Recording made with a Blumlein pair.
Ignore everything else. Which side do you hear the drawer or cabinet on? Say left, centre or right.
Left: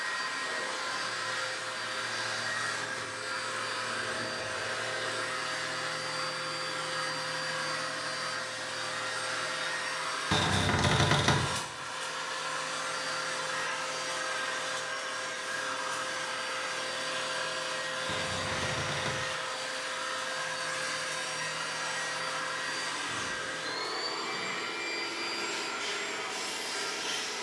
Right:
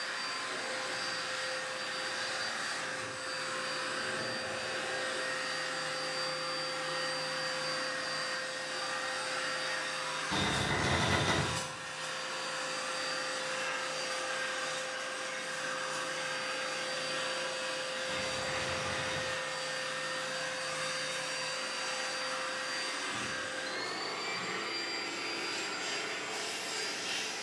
left.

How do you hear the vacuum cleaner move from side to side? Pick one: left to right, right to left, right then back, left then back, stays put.
stays put.